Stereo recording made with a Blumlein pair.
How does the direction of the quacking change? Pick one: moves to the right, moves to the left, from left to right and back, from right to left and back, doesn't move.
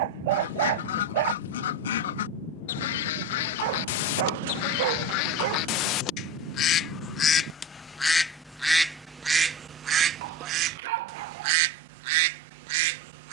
moves to the right.